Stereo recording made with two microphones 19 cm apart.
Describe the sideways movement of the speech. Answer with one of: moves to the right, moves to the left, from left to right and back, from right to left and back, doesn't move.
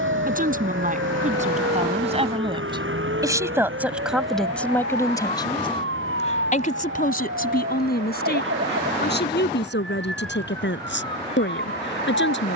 moves to the left.